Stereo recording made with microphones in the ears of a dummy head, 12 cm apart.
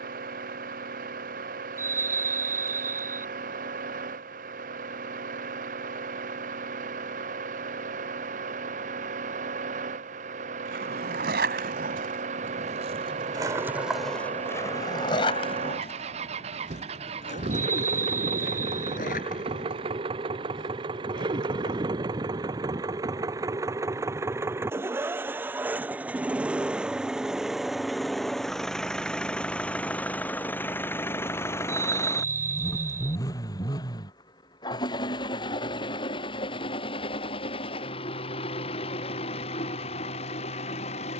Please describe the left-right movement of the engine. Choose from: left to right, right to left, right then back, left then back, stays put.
right to left.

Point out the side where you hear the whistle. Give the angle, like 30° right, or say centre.
20° right.